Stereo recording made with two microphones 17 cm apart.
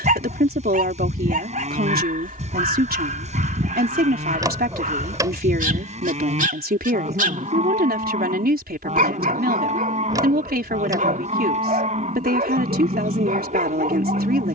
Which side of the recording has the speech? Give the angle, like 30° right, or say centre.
70° right.